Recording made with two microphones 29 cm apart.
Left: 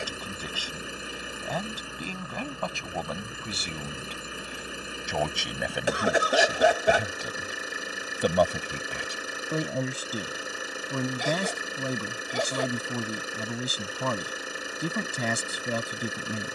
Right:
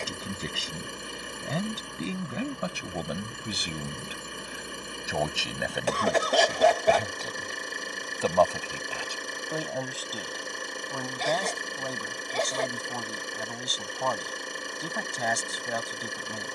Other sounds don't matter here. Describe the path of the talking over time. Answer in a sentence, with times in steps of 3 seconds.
You can hear the talking on the right from 0 s, in the centre from 3 s and on the left from 9 s.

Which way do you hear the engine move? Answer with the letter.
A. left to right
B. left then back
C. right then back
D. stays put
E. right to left
D.